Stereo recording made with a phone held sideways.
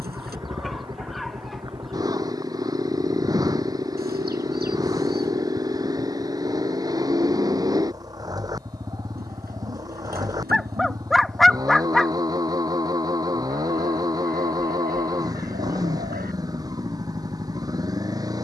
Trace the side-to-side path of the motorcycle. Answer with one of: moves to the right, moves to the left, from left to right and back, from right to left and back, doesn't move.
doesn't move.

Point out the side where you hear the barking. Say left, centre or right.
centre.